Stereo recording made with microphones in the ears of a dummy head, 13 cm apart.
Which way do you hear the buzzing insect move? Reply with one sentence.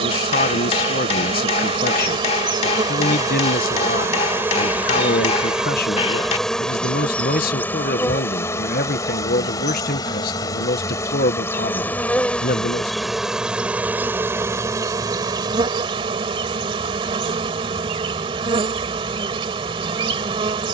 In this clip you hear the buzzing insect move from right to left and back again.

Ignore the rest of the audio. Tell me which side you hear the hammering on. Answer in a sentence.
You can hear the hammering on the left.